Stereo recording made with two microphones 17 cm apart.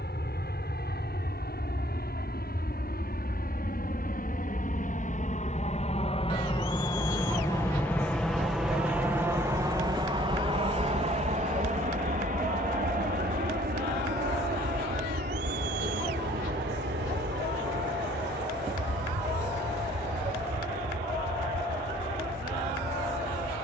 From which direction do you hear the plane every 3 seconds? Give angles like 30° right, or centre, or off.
70° left, 50° left, 20° left, 30° right, 50° right, 60° right, 70° right, 70° right.